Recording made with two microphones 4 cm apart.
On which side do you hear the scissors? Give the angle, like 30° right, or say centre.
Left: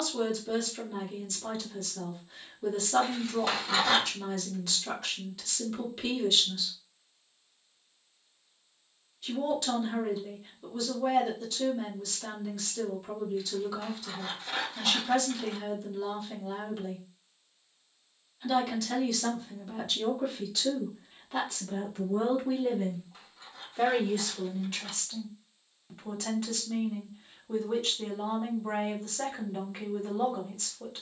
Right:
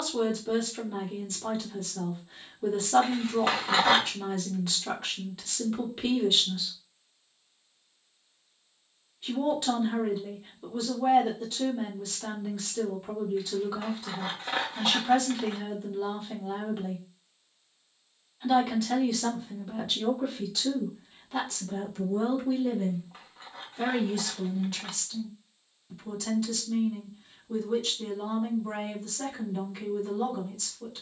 40° right.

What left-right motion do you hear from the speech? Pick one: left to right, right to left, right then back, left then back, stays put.
right to left.